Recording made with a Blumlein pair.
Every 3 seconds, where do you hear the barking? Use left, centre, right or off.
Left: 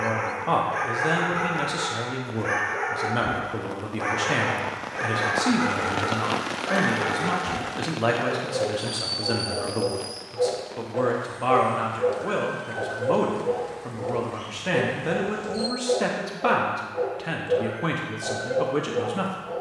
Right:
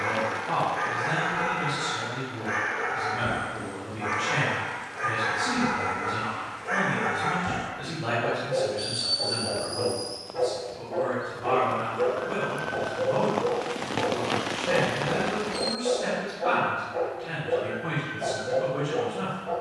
left, left, centre, right, right, right, right.